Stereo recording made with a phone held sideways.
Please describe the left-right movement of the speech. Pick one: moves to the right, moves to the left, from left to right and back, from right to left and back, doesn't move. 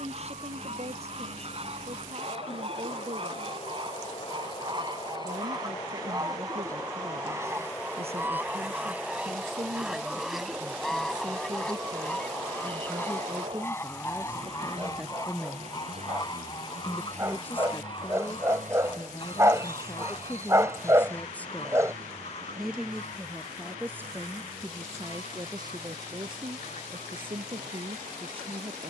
from right to left and back.